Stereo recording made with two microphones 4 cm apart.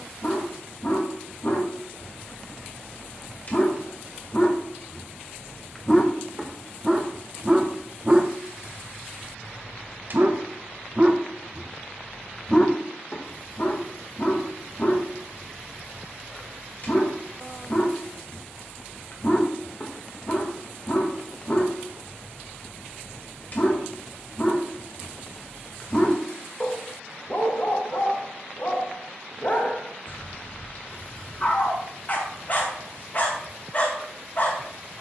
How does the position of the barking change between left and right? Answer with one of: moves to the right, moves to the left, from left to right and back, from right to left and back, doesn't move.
from left to right and back.